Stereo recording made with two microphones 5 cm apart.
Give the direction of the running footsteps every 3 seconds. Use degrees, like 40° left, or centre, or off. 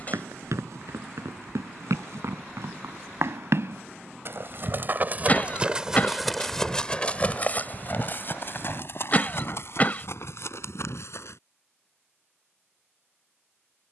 70° right, 40° right, 30° left, 60° left, off.